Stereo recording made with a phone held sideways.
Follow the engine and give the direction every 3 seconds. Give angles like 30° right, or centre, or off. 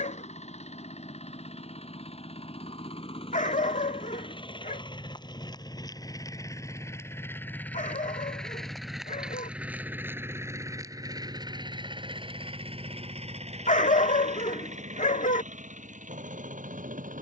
50° left, 30° left, 10° left, 20° right, 50° right, 60° right.